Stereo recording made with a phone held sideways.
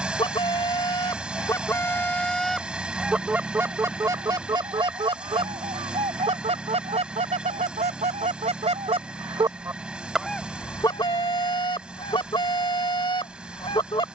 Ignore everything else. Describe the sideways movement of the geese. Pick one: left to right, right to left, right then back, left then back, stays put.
right then back.